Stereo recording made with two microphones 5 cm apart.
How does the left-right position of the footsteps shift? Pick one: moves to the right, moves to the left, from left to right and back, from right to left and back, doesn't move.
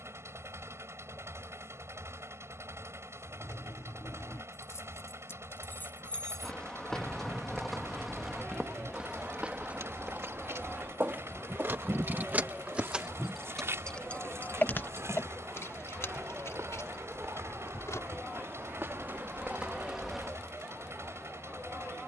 from left to right and back.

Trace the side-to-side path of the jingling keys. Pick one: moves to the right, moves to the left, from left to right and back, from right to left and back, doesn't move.
from left to right and back.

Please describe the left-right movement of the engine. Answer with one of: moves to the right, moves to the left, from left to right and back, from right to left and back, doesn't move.
doesn't move.